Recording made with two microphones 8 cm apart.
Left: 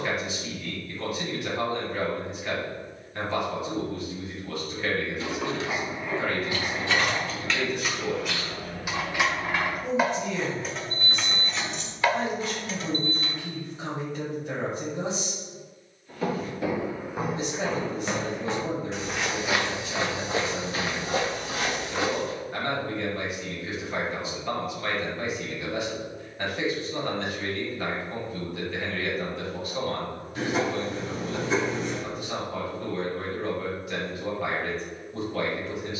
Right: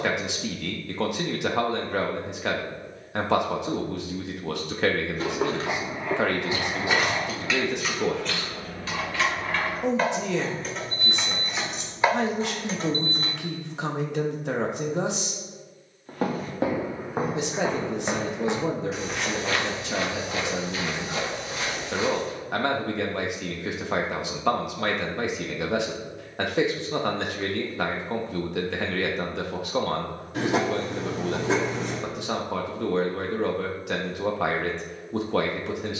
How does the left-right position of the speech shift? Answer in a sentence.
In this clip you hear the speech stay in one place.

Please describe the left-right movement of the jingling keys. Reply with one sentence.
You can hear the jingling keys go left and come back.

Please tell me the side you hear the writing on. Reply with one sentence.
You can hear the writing on the right.